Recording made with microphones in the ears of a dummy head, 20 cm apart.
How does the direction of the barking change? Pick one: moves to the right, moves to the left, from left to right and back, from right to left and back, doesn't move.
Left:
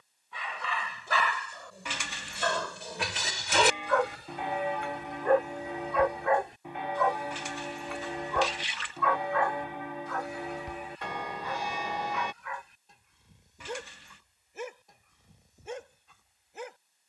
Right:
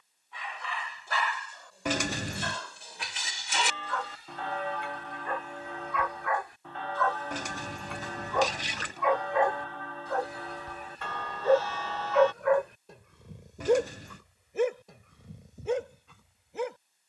moves to the right.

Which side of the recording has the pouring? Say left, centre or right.
right.